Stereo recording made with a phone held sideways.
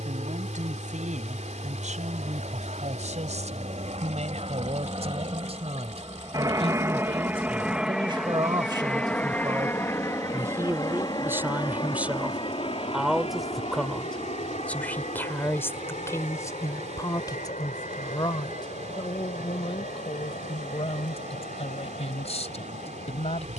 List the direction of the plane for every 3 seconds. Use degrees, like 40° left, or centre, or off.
60° right, 40° right, 10° right, 20° left, 40° left, 50° left, 60° left, 60° left.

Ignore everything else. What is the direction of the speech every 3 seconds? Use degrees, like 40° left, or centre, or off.
60° right, 50° right, 40° right, 20° right, centre, 20° left, 40° left, 50° left.